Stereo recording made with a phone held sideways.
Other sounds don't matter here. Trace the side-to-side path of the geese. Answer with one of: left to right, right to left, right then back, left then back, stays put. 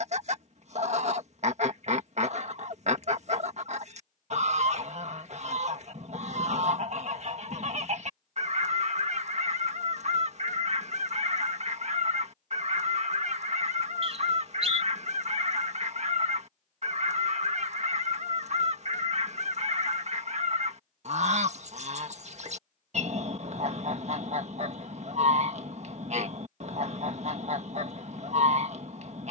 stays put.